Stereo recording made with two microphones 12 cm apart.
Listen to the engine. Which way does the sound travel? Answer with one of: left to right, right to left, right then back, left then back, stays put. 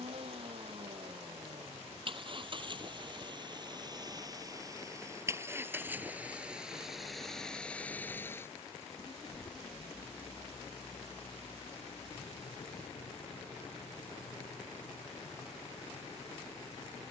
right to left.